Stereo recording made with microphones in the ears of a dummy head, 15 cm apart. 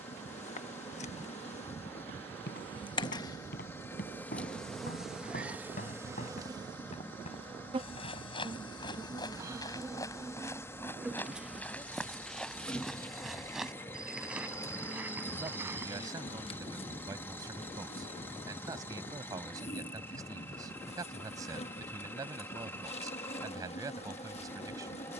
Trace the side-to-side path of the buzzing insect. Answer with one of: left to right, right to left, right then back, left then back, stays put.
right then back.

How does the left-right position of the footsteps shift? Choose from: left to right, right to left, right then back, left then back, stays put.
left to right.